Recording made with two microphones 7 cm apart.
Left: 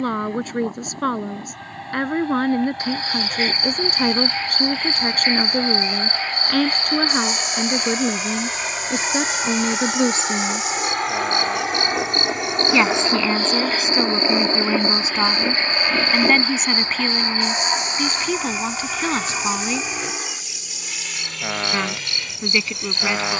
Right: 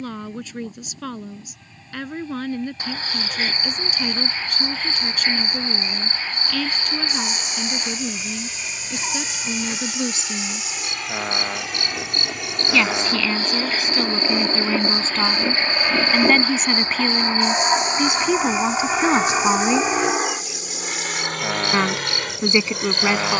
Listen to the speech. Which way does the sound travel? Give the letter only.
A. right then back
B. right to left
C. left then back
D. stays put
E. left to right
E.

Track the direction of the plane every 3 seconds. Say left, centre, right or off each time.
left, left, left, left, left, centre, right, right.